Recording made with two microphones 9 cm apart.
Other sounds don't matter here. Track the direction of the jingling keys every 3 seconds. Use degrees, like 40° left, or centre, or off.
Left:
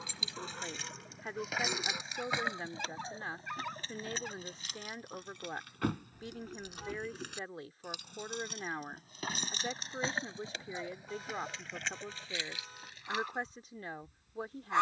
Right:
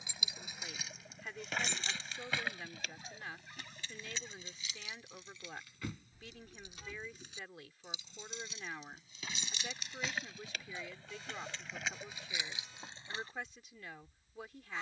10° left, 50° left, 60° left, 20° left, 20° right.